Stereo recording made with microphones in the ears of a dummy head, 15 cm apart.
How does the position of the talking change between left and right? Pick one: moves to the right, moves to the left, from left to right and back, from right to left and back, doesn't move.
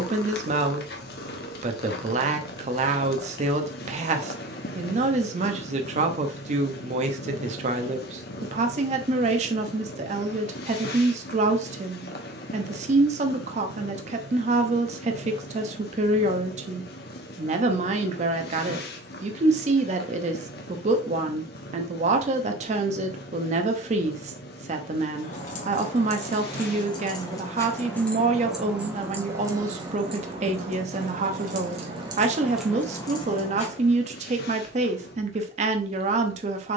doesn't move.